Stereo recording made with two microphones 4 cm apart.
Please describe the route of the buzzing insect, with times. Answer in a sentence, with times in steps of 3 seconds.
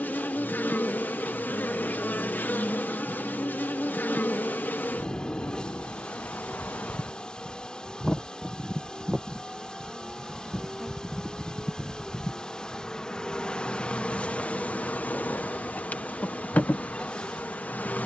You can hear the buzzing insect on the left from 0 s, in the centre from 9 s and on the left from 12 s.